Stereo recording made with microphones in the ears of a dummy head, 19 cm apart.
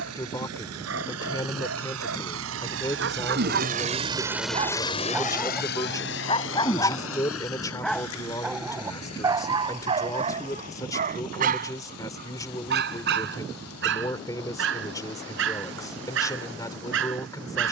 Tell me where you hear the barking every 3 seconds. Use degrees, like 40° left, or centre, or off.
60° right, 30° right, 10° left, 30° right, 50° right, 60° right.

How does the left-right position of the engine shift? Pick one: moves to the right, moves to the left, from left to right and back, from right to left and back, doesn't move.
moves to the left.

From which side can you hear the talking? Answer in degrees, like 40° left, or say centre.
20° left.